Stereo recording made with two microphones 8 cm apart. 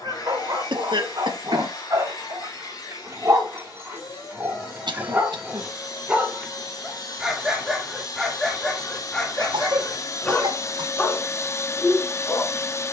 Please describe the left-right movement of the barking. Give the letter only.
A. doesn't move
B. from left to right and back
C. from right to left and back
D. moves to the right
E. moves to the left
E.